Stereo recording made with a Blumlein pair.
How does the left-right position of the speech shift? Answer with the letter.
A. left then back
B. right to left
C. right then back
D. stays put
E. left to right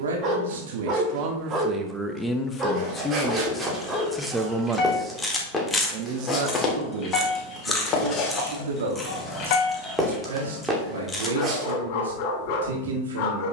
A.